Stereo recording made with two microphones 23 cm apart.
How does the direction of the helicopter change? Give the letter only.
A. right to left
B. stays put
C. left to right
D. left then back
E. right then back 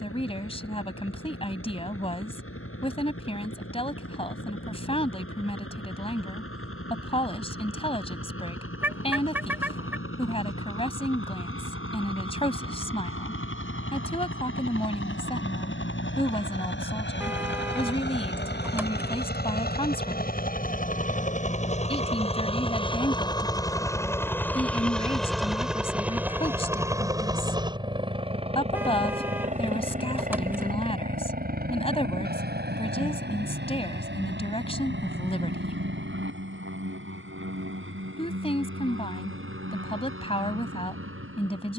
C.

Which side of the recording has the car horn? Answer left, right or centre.
centre.